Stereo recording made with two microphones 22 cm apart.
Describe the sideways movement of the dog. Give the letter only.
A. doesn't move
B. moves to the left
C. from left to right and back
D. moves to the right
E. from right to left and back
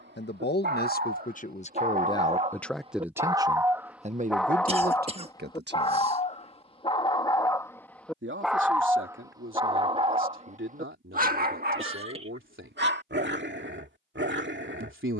E.